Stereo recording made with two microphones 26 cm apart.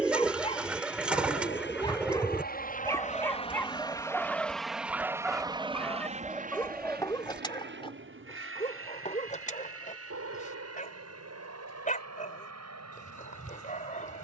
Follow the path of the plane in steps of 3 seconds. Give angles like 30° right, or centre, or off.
50° left, centre, 40° right, 60° right, 70° right.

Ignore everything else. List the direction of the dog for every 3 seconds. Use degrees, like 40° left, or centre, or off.
20° left, centre, 20° left, 30° left, 30° left.